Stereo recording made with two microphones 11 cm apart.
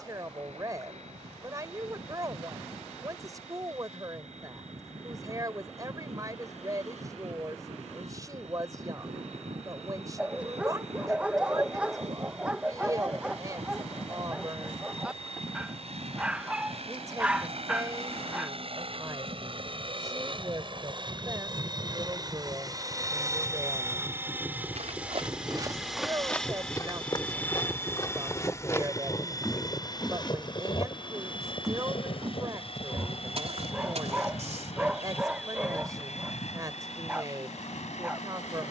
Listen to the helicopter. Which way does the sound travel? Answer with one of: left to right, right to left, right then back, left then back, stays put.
right to left.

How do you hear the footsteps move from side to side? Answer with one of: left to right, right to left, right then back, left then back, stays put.
left then back.